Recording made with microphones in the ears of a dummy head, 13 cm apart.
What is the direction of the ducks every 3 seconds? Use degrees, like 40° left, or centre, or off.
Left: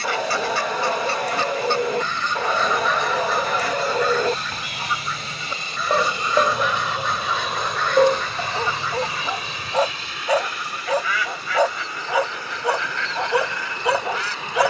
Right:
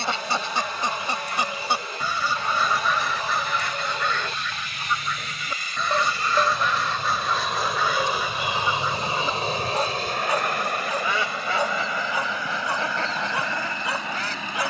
10° right, centre, 10° right, 20° right, 30° right.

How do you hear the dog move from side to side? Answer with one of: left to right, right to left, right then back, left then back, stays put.
stays put.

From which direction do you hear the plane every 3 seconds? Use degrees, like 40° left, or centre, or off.
50° left, 30° left, centre, 40° right, 60° right.